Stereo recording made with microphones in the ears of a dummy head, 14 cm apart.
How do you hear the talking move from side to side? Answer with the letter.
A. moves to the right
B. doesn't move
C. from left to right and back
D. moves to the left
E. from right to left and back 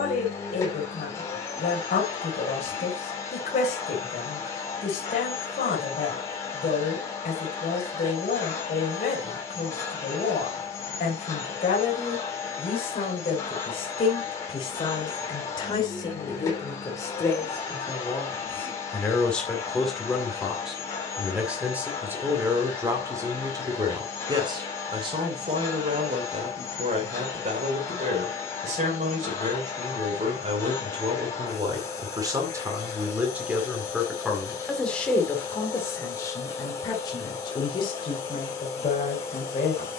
C.